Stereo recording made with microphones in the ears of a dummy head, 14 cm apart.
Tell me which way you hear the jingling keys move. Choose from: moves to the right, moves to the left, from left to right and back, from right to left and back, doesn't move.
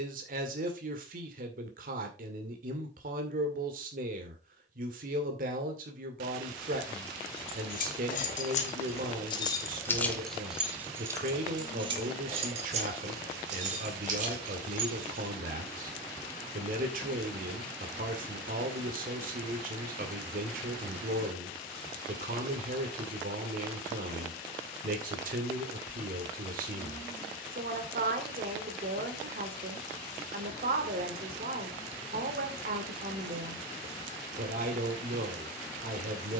moves to the right.